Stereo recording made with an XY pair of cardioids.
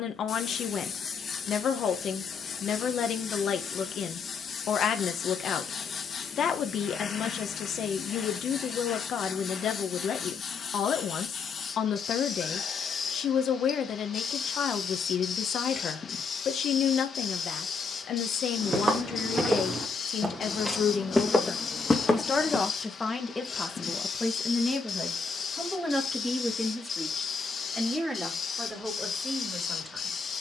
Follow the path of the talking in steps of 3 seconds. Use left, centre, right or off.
left, left, left, left, left, left, left, left, centre, centre.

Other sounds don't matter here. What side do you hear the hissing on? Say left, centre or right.
left.